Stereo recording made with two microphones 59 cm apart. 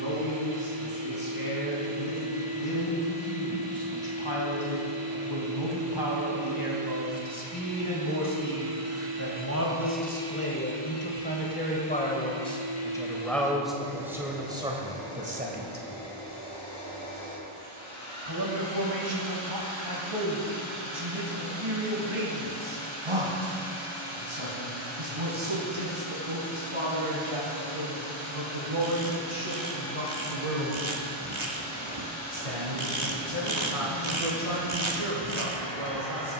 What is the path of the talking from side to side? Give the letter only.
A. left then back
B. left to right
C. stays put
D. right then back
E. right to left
B.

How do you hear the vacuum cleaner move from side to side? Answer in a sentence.
In this clip you hear the vacuum cleaner move to the left.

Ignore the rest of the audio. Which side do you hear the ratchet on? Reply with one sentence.
You can hear the ratchet on the right.